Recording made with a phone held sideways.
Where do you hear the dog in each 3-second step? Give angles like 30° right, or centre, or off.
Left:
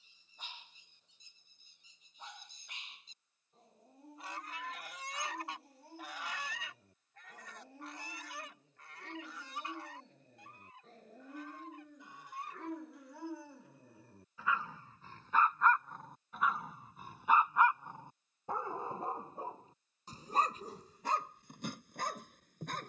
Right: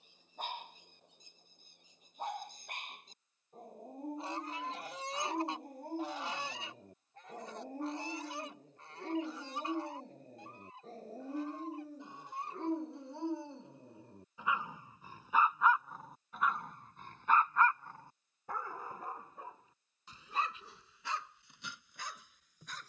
60° right, 60° right, 50° right, 40° right, 30° right, centre, 40° left, 50° left.